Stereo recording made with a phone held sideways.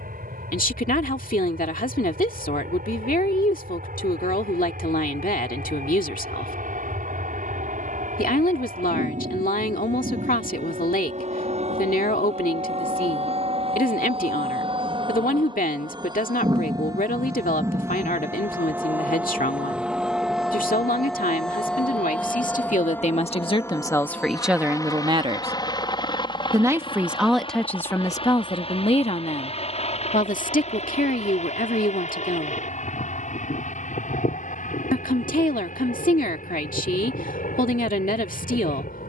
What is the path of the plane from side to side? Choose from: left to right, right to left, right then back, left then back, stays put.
right to left.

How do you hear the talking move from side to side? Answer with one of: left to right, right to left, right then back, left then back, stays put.
right then back.